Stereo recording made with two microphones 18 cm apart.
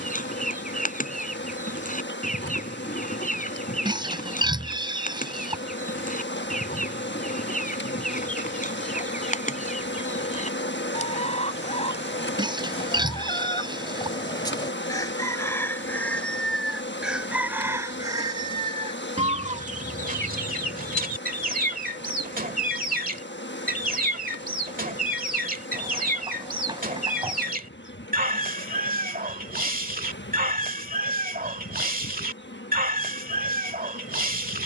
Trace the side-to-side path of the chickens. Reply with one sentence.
You can hear the chickens move from left to right.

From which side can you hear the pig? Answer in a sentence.
In this clip you hear the pig on the right.